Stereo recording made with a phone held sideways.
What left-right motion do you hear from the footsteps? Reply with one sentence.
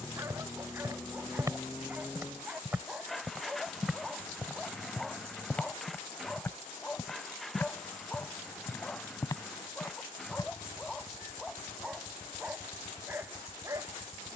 You can hear the footsteps move to the left.